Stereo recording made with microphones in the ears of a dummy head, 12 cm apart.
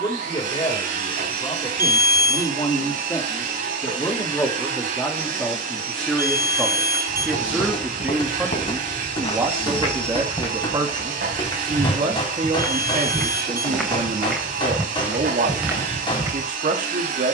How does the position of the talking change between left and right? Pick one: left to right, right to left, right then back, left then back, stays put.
left to right.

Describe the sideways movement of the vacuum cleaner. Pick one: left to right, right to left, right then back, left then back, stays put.
stays put.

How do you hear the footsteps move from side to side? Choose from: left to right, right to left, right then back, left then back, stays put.
left to right.